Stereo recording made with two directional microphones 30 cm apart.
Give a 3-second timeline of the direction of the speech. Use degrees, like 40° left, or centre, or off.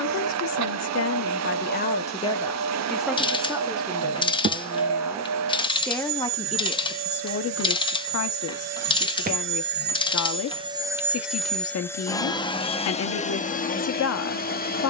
40° left, 10° right, 40° left, 50° left, 50° left.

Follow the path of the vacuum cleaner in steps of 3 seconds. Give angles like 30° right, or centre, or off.
60° right, 60° right, 60° right, 20° right, 20° left.